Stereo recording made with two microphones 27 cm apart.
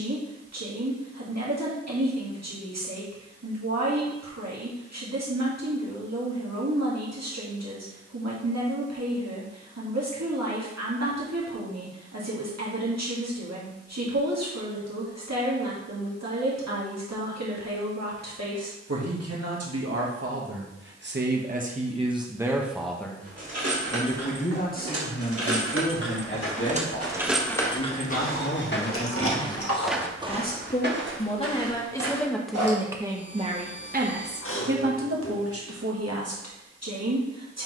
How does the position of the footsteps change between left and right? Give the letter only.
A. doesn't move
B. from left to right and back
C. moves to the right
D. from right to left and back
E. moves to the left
C.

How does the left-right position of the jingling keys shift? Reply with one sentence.
You can hear the jingling keys move from right to left.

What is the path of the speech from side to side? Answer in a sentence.
In this clip you hear the speech move from right to left and back again.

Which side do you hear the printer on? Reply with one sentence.
In this clip you hear the printer on the left.